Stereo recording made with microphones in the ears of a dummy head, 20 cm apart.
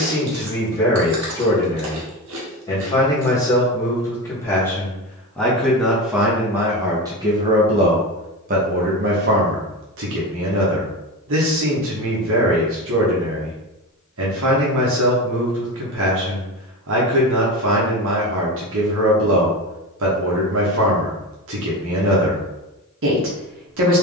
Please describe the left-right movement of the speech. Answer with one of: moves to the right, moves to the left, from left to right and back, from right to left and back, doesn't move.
moves to the right.